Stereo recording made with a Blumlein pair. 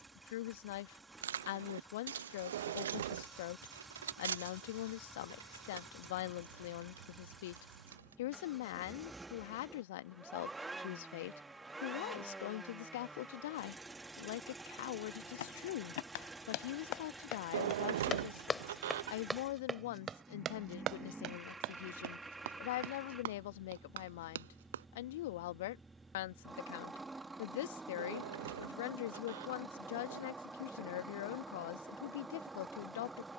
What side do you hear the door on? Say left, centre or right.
right.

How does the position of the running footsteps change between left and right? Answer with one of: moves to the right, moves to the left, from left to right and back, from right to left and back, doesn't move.
moves to the right.